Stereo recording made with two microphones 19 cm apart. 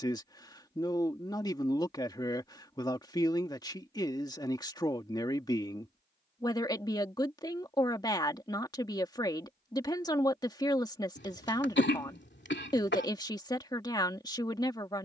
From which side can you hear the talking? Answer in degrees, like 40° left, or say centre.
20° left.